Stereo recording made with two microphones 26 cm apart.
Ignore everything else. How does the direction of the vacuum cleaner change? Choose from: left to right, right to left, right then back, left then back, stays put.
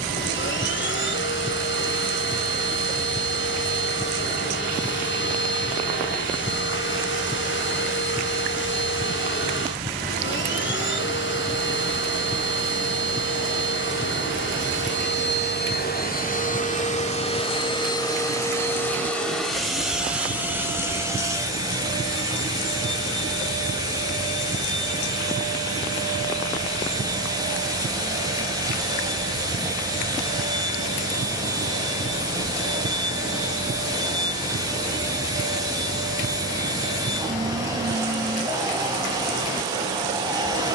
left to right.